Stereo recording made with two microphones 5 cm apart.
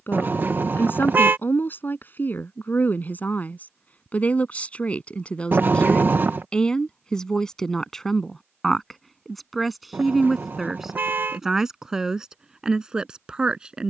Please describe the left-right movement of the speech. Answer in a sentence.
You can hear the speech travel towards the right.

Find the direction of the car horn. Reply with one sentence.
You can hear the car horn on the right.